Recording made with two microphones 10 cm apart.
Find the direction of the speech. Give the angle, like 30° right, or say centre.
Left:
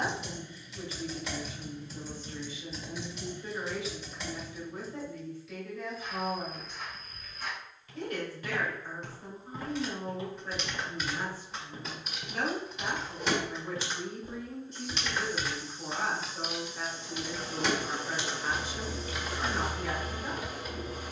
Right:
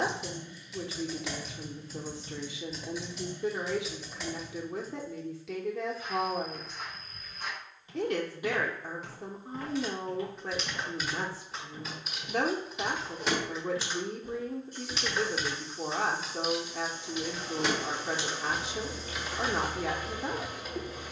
80° right.